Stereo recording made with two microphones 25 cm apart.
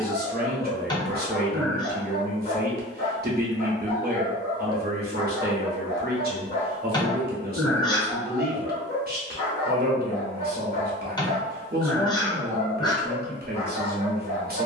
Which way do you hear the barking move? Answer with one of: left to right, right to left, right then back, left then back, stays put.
stays put.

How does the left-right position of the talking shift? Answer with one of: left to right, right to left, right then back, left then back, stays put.
stays put.